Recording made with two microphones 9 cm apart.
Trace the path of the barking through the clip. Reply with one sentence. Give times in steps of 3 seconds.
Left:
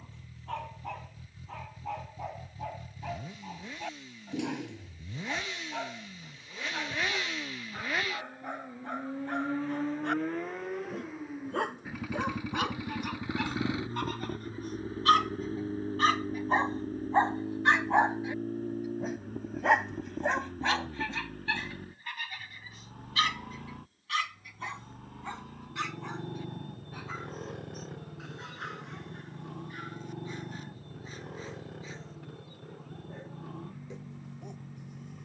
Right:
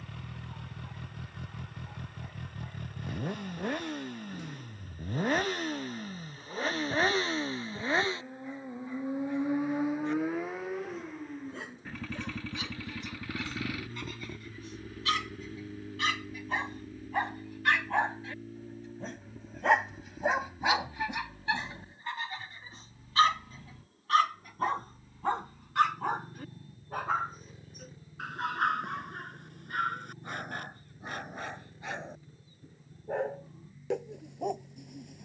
In this clip you hear the barking on the left from 0 s, in the centre from 18 s and on the right from 21 s.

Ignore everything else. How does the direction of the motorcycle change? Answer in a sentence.
In this clip you hear the motorcycle move from right to left.